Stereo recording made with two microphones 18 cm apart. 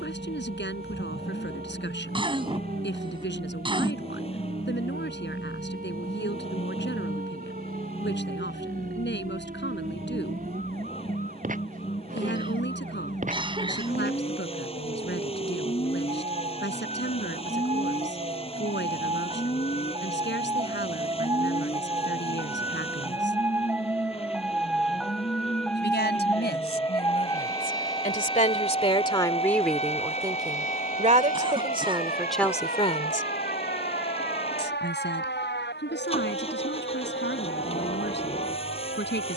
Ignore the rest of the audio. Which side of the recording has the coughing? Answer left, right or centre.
right.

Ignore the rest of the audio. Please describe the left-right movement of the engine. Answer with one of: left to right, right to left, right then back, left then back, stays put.
stays put.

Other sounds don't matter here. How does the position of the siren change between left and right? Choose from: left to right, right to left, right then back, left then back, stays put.
right to left.